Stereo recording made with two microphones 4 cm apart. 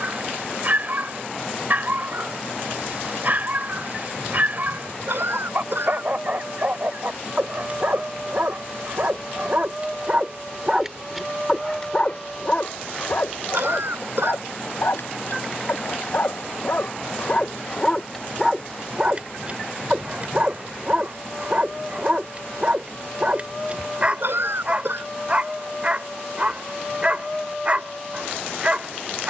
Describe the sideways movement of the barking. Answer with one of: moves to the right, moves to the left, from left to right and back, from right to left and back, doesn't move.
from right to left and back.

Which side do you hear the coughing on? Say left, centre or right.
right.